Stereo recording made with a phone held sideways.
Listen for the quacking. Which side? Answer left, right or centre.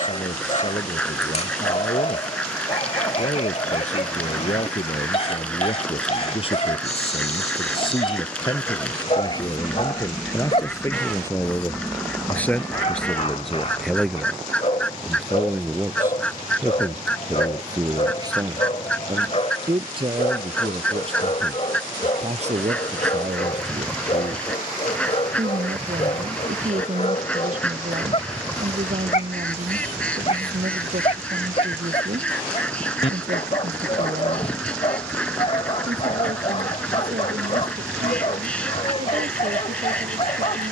centre.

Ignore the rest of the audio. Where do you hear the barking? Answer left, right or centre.
left.